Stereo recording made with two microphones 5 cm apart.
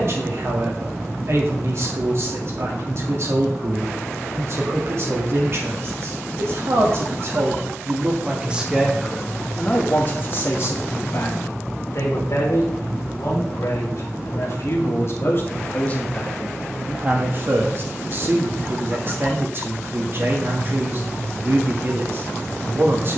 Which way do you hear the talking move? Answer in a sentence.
You can hear the talking move from right to left and back again.